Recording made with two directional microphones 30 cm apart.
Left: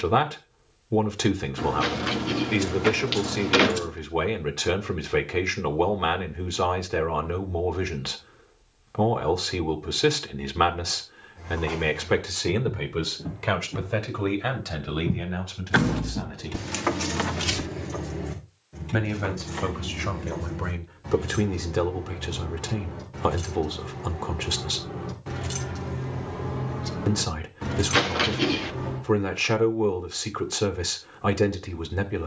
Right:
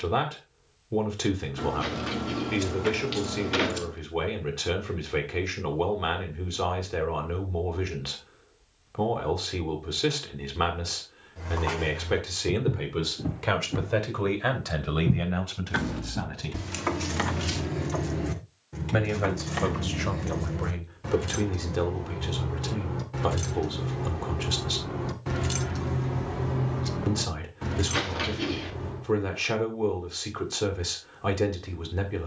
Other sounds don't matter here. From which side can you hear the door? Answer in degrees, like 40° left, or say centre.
40° left.